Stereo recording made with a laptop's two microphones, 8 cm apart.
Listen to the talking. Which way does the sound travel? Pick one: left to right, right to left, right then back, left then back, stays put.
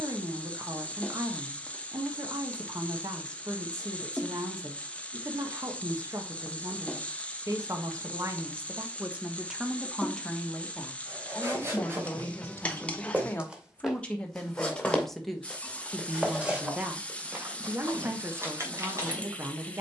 left then back.